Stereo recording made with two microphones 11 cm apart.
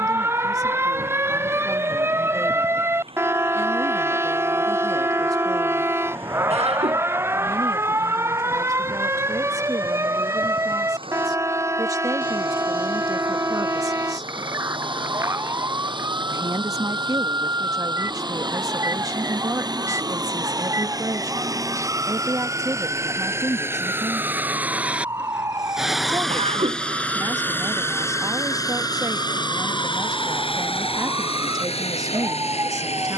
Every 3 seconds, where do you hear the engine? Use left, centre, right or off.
right, right, right, right, right, right, right, right, centre, left, left.